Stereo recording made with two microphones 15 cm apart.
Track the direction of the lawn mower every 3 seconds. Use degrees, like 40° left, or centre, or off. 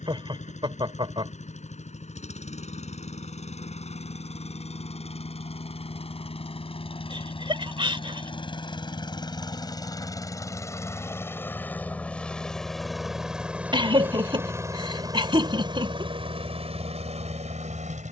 50° left, 50° left, 40° left, 20° left, 10° right, 40° right.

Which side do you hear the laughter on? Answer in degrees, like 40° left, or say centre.
30° right.